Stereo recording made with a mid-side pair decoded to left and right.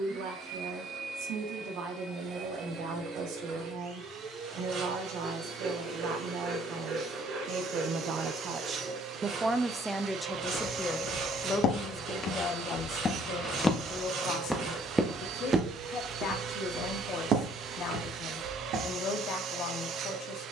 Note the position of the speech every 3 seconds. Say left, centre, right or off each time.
right, right, right, centre, left, left, left.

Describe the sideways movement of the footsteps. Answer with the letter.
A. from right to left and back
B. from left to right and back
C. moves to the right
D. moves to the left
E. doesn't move
C.